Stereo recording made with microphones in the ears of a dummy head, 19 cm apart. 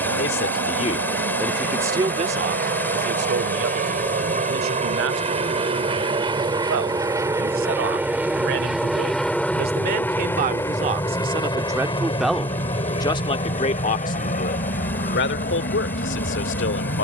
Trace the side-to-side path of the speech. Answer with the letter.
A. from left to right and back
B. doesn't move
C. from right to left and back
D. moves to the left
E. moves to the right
A.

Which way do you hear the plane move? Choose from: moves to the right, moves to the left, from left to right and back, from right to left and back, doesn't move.
moves to the left.